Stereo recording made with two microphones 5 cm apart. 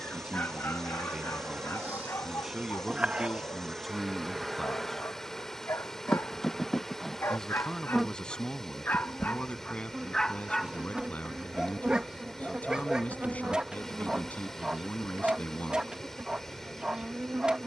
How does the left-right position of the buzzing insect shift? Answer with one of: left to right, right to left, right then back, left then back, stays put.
left then back.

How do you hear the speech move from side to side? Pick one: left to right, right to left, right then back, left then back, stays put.
right to left.